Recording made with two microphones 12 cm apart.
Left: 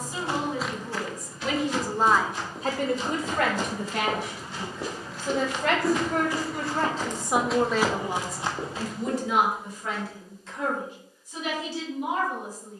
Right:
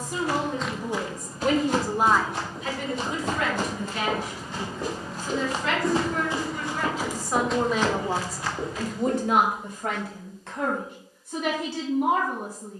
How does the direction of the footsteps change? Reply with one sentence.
You can hear the footsteps go right and come back.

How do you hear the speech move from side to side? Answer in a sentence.
You can hear the speech go left and come back.